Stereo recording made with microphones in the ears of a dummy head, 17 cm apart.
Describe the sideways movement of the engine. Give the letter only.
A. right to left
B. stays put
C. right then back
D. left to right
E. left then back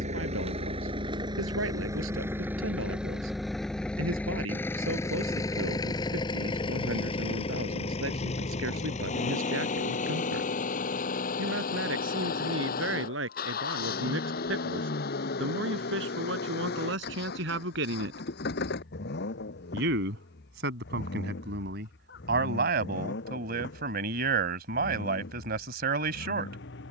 A.